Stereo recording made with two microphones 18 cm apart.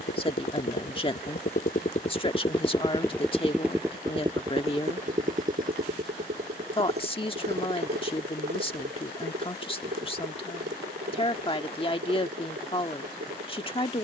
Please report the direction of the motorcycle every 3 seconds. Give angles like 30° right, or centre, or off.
50° left, 30° right, 60° right, 70° right, 70° right.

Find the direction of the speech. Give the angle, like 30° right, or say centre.
30° left.